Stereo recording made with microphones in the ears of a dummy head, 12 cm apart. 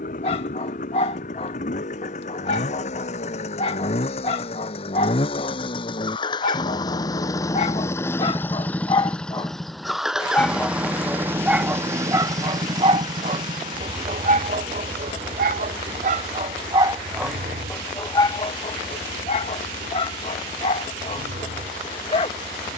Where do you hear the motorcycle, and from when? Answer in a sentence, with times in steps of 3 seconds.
You can hear the motorcycle on the left from 0 s, in the centre from 9 s and on the right from 12 s.